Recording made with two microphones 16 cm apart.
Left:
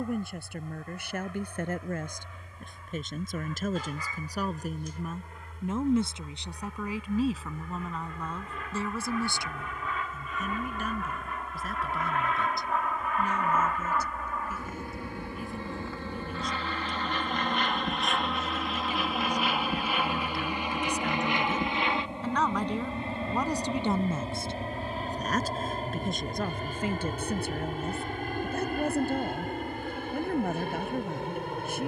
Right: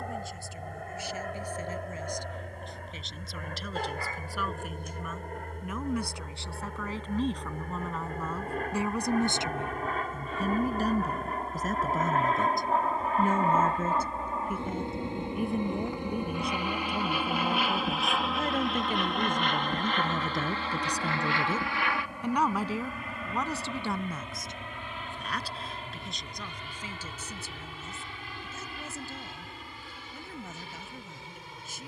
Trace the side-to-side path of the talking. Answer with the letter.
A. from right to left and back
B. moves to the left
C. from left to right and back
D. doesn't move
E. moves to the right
C.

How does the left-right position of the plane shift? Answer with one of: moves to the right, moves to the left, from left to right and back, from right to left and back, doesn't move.
moves to the left.